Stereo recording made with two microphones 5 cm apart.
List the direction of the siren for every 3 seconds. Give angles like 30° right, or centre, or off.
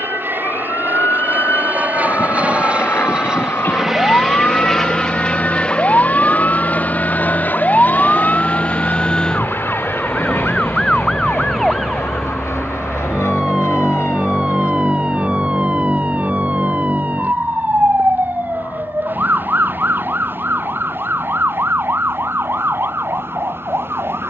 60° left, 50° left, 30° left, 10° left, 10° right, 30° right, 40° right, 50° right.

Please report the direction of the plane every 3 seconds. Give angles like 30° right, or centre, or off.
40° right, centre, 40° left, 60° left, 70° left, 70° left, 80° left, 80° left.